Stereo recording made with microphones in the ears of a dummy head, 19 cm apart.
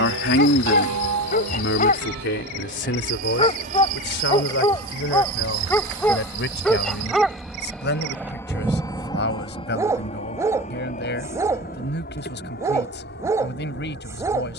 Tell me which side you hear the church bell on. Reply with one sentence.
In this clip you hear the church bell on the right.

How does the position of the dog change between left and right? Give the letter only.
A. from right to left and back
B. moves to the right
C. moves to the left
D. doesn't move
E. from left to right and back
B.